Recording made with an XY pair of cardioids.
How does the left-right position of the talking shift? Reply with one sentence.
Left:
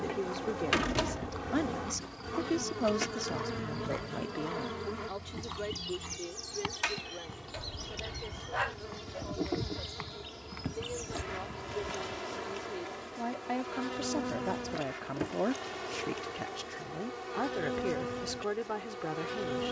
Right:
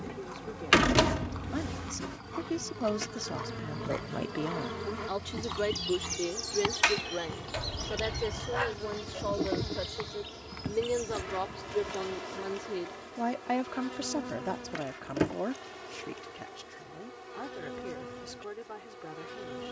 You can hear the talking go right and come back.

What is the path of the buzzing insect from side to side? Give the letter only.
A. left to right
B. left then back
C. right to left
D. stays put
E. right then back
E.